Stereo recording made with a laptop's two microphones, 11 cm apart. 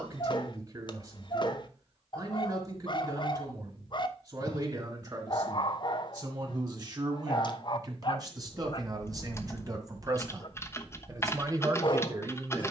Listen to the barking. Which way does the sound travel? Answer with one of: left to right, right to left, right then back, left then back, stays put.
stays put.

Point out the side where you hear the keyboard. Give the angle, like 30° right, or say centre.
20° left.